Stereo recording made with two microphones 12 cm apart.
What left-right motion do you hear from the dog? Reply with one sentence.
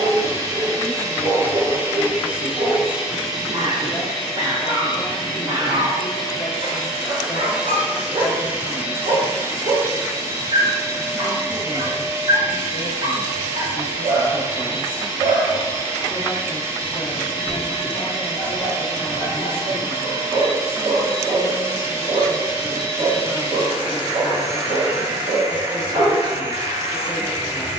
In this clip you hear the dog stay in one place.